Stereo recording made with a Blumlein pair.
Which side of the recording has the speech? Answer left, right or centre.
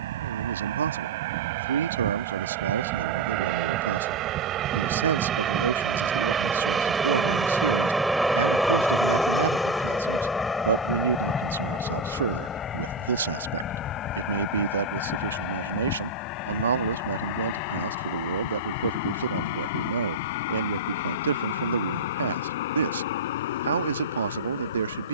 right.